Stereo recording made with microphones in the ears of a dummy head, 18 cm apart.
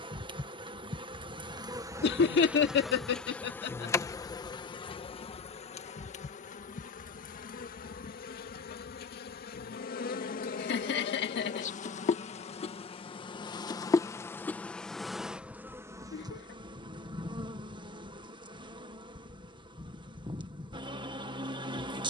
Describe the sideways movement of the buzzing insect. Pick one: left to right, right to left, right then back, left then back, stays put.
left then back.